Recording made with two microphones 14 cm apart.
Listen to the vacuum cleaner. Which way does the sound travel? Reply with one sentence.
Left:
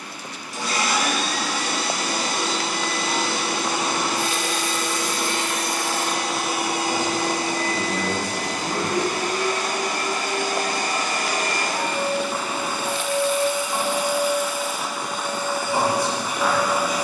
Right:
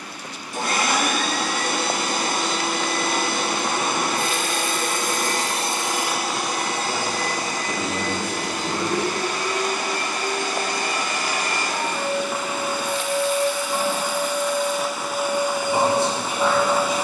In this clip you hear the vacuum cleaner move from right to left and back again.